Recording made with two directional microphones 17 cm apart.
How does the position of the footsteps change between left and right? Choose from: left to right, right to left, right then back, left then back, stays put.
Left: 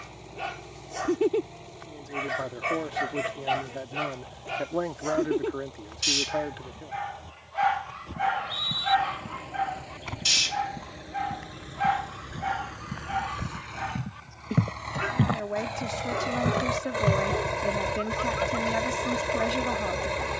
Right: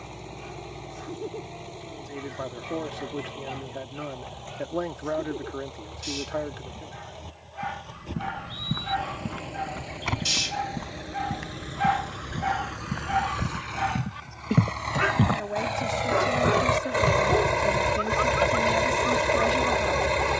right to left.